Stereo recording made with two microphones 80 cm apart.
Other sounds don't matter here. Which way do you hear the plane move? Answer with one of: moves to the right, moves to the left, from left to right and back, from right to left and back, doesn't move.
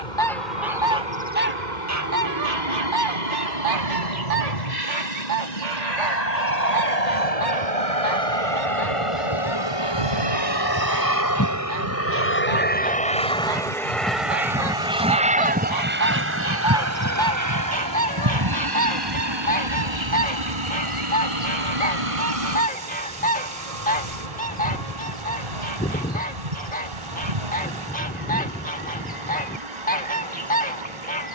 moves to the right.